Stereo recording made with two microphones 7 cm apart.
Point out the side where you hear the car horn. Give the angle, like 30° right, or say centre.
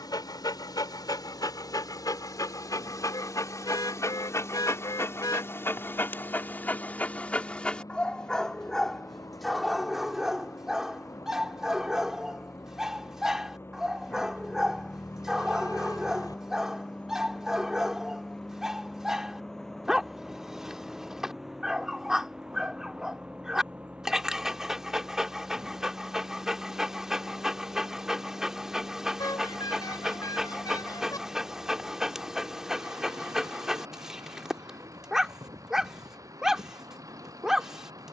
60° left.